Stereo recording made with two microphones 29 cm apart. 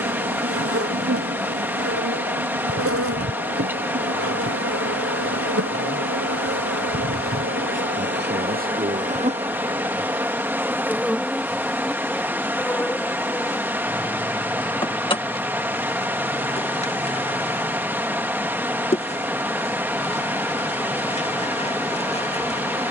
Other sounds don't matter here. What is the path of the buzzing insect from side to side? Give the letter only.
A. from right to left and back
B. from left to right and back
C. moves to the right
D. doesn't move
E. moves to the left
E.